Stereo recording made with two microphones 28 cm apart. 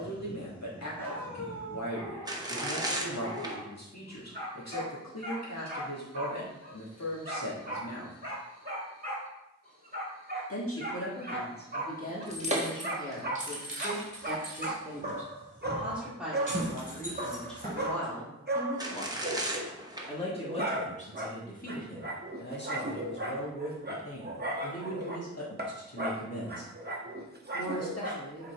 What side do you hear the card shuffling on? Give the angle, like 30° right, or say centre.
10° right.